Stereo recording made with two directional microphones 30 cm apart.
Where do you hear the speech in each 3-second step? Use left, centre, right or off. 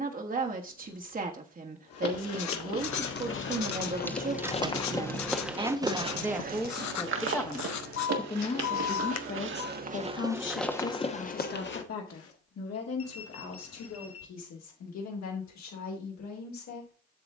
right, right, centre, left, left, left.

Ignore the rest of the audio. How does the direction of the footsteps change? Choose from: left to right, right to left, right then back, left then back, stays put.
right then back.